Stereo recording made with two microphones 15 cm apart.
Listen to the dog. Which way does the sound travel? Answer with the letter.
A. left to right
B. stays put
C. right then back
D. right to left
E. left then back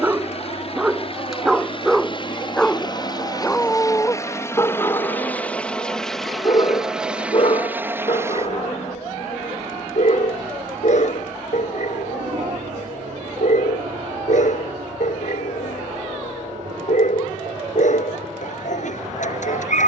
D.